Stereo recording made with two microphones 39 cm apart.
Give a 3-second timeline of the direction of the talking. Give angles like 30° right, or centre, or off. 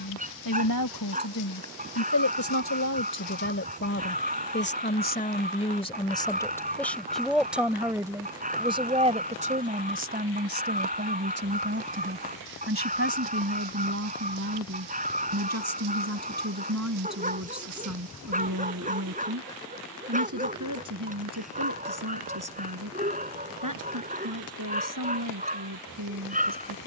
50° left, 30° left, centre, 20° right, 40° right, 50° right, 50° right, 50° right, 60° right.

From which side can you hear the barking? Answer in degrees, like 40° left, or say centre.
20° right.